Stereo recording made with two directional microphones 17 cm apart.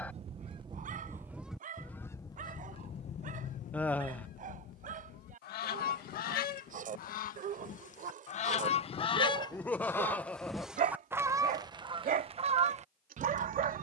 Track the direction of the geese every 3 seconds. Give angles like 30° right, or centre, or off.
centre, 60° left, 50° left, centre, 40° right.